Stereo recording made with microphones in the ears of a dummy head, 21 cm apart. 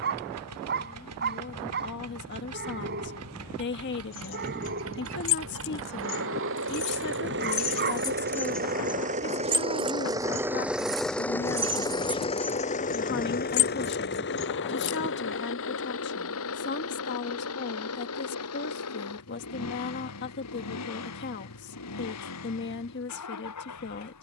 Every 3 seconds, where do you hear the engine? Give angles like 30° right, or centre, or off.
70° right, 70° right, 50° right, 10° right, 40° left, 60° left, 70° left, 70° left.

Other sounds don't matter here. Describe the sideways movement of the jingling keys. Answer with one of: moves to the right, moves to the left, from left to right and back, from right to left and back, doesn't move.
from left to right and back.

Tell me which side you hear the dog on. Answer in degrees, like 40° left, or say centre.
40° right.